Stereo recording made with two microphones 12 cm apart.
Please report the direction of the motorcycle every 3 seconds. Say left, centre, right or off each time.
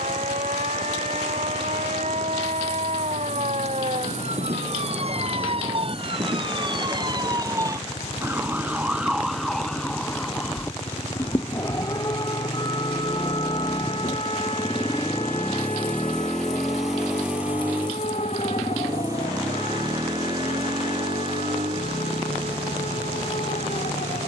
left, left, left, left, left, centre, right, right.